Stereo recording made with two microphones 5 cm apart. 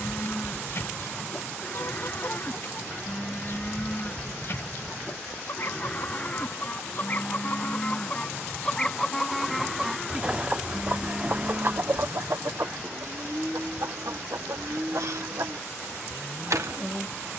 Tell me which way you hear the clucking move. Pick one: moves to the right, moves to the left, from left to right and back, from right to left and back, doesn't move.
moves to the right.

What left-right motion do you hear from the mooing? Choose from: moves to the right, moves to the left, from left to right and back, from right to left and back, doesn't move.
moves to the right.